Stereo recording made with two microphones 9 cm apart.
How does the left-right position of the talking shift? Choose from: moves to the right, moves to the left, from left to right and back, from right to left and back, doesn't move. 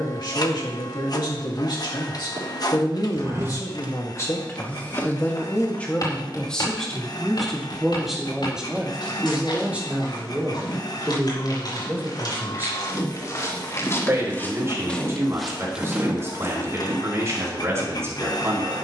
moves to the right.